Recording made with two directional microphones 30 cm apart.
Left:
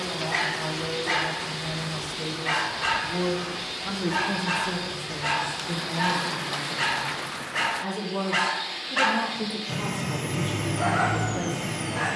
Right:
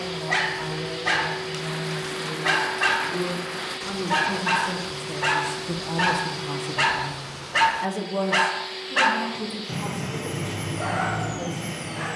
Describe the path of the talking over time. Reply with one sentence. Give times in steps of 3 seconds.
You can hear the talking on the left from 0 s, in the centre from 3 s, on the right from 6 s and on the left from 9 s.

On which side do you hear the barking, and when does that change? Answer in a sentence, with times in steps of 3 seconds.
You can hear the barking on the right from 0 s and in the centre from 9 s.